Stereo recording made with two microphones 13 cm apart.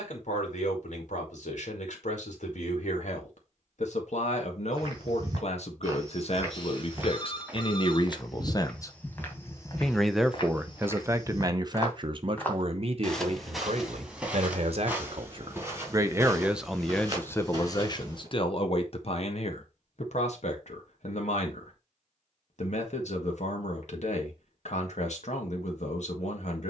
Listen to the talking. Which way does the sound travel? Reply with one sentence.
In this clip you hear the talking go right and come back.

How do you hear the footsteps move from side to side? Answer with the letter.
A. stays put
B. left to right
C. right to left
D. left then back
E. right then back
D.